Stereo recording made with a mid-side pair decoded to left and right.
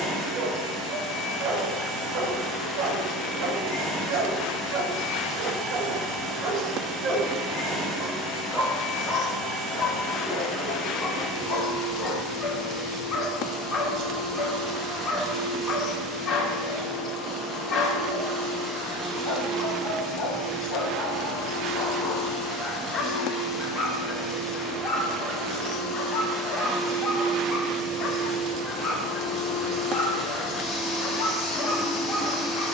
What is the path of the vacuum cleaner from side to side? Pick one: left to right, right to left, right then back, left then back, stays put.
right to left.